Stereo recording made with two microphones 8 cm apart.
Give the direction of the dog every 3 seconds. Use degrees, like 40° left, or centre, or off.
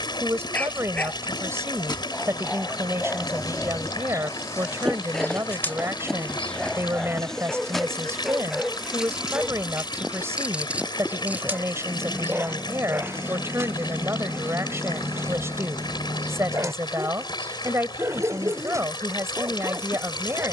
20° left, 10° left, centre, 10° right, 20° right, 30° right, 30° right.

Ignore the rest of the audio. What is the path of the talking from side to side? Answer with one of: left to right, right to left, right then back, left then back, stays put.
stays put.